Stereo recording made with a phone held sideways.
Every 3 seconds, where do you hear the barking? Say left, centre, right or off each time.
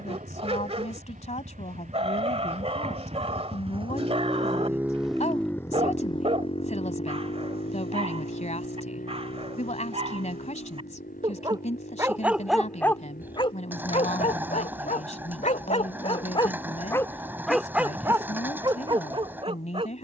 right, right, right, right, left, left, right.